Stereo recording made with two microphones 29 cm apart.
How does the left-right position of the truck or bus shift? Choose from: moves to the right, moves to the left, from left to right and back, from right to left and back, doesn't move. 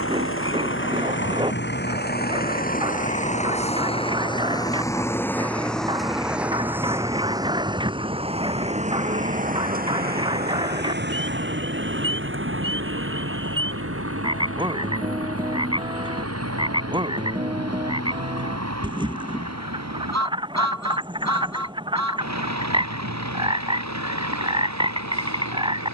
moves to the right.